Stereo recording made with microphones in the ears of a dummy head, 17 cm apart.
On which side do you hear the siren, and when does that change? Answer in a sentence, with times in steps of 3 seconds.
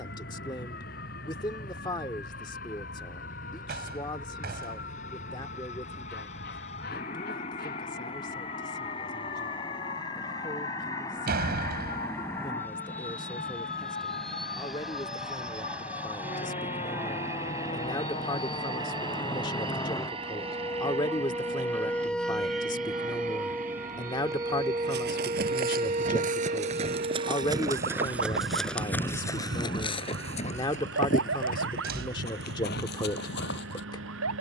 You can hear the siren on the left from 0 s, in the centre from 21 s and on the right from 24 s.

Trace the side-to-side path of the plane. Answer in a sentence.
You can hear the plane travel towards the right.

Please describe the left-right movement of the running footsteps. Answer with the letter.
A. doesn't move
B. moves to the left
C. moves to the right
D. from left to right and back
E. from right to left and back
B.